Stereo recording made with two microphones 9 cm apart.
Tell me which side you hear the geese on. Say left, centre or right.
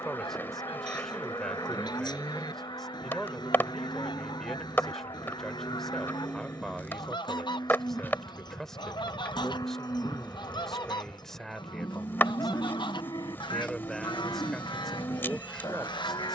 left.